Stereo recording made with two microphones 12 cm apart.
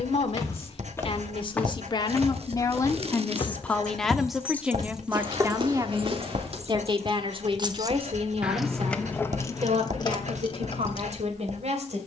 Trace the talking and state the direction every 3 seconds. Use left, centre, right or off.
left, centre, right, right.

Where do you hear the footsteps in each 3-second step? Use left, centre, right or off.
centre, right, right, off.